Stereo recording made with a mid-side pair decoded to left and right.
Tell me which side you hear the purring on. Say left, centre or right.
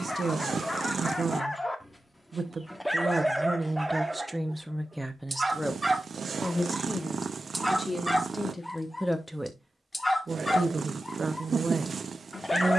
right.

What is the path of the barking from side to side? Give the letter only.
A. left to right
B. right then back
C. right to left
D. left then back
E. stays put
B.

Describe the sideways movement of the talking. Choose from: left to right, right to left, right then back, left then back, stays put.
left then back.